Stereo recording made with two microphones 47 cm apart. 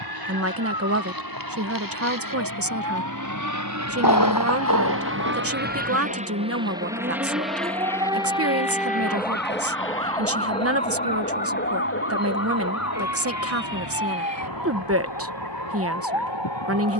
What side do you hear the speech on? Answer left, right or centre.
right.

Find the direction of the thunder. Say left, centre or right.
left.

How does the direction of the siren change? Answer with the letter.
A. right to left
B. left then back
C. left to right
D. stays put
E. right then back
A.